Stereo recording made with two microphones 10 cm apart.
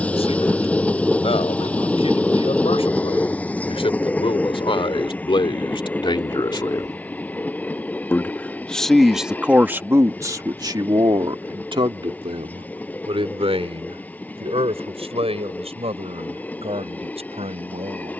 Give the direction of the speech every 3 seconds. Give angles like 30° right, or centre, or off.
70° left, 60° left, 30° left, 30° right, 70° right, 80° right.